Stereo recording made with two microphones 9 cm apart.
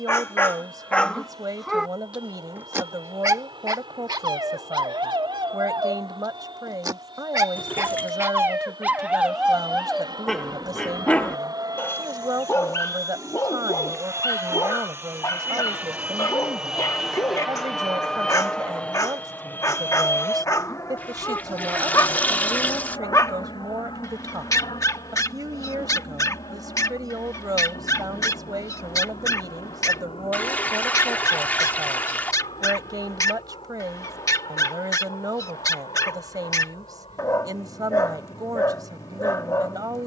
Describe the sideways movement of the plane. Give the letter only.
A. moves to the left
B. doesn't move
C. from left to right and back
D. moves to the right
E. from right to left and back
A.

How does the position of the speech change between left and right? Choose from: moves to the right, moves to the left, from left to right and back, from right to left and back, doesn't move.
doesn't move.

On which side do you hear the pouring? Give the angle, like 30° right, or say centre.
20° left.